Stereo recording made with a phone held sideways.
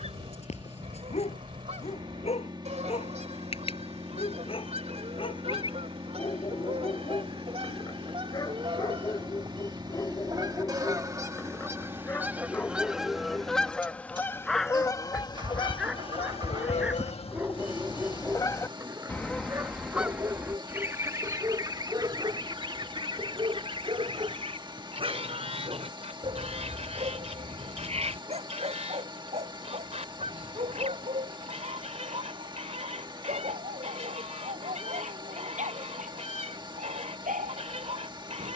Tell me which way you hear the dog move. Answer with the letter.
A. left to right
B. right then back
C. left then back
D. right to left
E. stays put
A.